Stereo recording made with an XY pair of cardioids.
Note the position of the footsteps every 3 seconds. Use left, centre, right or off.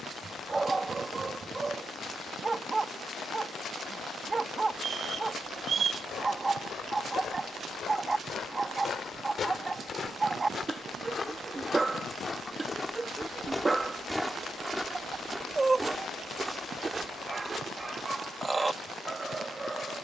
off, left, left, left, centre, right, off.